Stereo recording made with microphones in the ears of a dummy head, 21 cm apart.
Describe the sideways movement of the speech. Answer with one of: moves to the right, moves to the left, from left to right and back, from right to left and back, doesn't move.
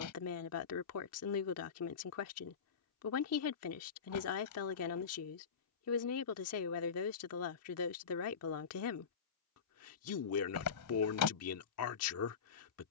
doesn't move.